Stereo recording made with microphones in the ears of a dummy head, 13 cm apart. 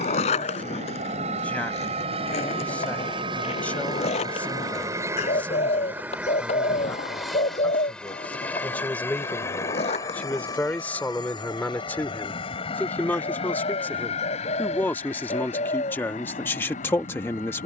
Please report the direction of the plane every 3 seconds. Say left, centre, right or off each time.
right, right, centre, left, left, left.